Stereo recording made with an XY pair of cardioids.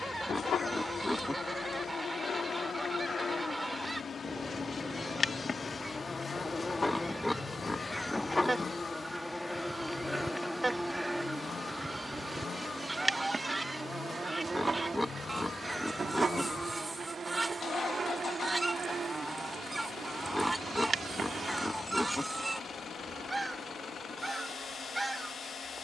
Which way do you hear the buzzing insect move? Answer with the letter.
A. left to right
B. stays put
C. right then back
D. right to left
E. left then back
A.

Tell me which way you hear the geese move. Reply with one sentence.
In this clip you hear the geese stay put.